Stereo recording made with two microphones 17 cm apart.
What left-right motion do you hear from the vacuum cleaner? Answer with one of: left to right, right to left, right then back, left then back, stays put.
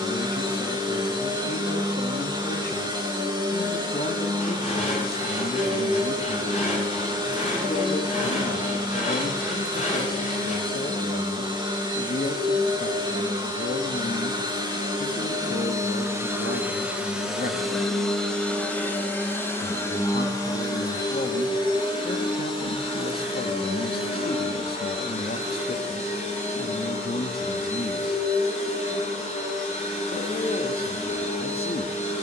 right to left.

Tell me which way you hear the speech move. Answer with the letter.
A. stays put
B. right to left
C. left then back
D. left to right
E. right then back
A.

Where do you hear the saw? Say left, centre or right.
left.